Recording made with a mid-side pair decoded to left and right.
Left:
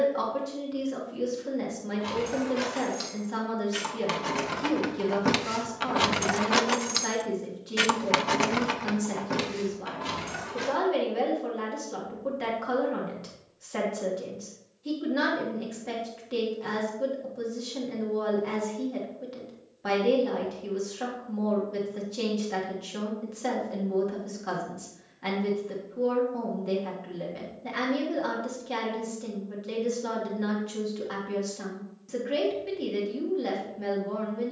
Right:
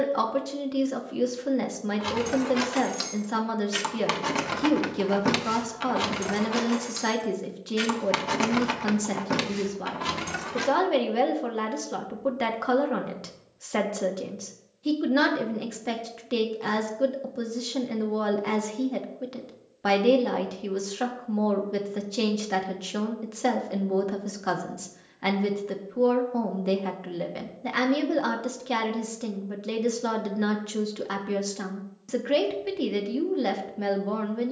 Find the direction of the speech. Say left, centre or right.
right.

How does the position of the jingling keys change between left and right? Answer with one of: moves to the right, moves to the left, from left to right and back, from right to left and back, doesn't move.
from right to left and back.